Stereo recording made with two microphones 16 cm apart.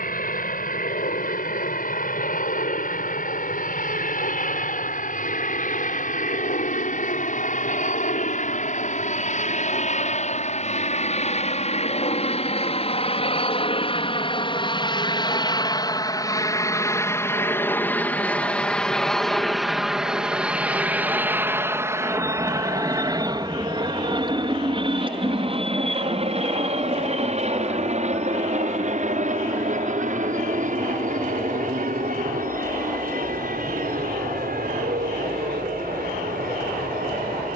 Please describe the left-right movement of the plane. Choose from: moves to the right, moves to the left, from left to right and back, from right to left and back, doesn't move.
moves to the right.